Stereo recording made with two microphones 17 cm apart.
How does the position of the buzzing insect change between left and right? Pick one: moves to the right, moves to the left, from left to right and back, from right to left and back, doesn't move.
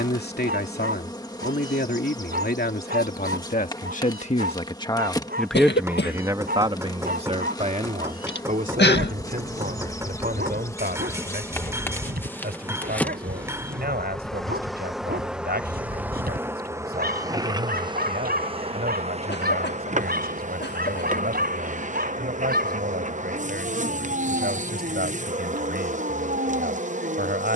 moves to the right.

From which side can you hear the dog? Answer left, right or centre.
right.